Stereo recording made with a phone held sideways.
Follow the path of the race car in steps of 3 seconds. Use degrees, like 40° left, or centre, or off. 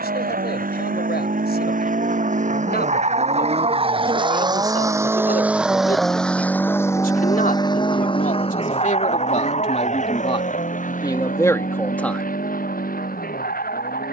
60° right, 30° right, 20° left, 50° left, 60° left.